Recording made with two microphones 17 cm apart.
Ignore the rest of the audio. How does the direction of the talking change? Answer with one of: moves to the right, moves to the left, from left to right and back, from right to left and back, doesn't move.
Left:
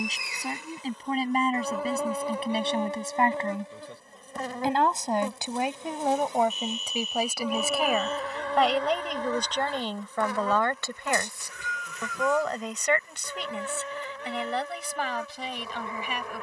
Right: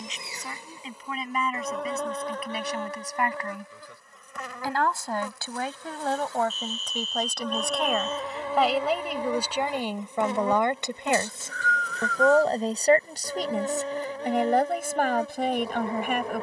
moves to the right.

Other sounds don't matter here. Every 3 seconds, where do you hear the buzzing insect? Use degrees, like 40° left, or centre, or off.
centre, 30° left, 10° left, 20° right, 30° right, 30° right.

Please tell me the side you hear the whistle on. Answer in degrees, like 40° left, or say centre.
20° left.